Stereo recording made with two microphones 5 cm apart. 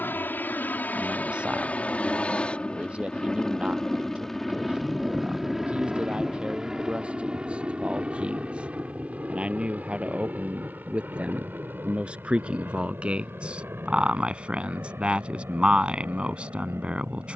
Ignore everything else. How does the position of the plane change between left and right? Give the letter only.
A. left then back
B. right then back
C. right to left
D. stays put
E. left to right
E.